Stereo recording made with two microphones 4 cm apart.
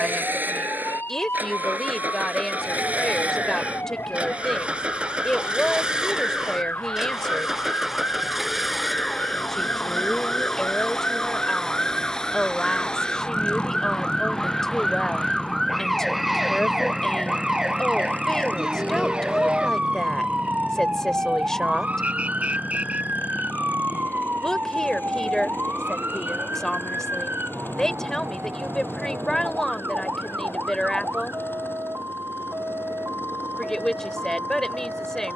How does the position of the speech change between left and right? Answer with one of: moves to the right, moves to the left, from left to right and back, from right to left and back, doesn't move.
doesn't move.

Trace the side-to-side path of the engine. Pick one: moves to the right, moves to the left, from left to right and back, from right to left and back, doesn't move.
moves to the left.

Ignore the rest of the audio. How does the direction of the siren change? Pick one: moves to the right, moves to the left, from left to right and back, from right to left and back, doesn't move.
moves to the right.